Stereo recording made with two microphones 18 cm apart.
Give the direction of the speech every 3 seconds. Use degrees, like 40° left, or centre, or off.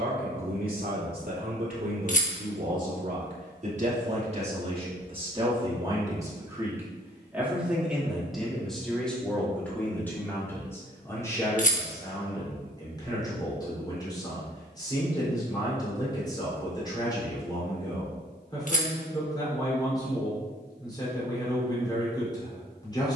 50° right, 30° right, 10° right, 10° left, 20° left, 20° left, 20° left, 20° left.